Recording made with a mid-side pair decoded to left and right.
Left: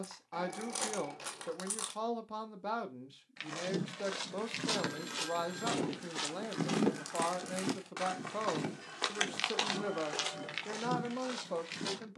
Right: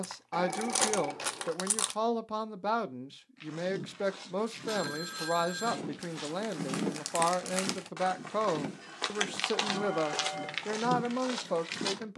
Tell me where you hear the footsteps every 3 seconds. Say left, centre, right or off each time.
off, left, left, right.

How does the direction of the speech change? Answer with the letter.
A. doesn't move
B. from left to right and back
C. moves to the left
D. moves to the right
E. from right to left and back
A.